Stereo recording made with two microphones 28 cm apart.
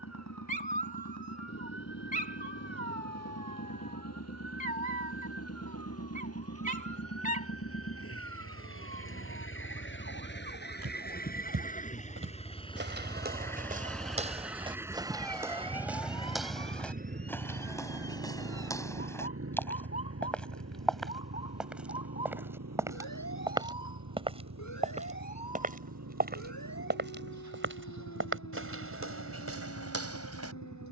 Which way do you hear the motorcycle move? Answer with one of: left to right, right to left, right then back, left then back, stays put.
left to right.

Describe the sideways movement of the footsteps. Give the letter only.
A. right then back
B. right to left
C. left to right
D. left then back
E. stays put
D.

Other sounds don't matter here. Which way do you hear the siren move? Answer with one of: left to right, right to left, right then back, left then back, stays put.
right to left.